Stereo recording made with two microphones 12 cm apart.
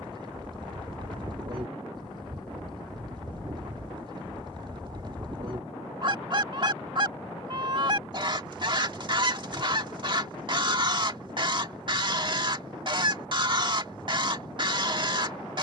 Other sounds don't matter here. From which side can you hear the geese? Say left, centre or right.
right.